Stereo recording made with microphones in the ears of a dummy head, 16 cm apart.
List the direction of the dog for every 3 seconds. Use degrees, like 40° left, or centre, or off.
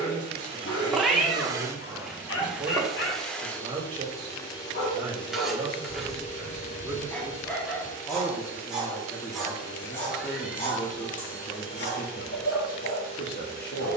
60° left, 40° left, 10° left, 30° left, 60° left.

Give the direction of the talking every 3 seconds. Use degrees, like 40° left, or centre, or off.
20° right, 20° right, centre, 30° left, 50° left.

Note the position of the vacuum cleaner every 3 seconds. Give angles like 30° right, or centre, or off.
20° right, 20° left, 40° left, 50° left, 60° left.